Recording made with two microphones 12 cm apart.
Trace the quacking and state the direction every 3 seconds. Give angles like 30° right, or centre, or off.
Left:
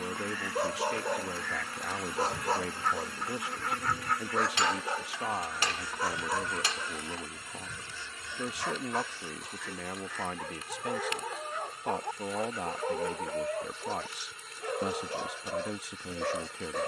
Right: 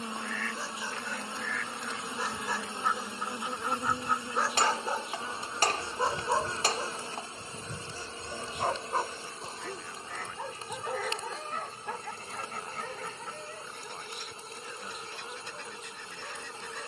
centre, 20° right, 40° right, 50° right, 60° right, 70° right.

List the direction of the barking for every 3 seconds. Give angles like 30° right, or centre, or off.
50° left, centre, 40° right, 10° right, 50° left, 60° left.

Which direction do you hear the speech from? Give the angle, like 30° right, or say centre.
90° left.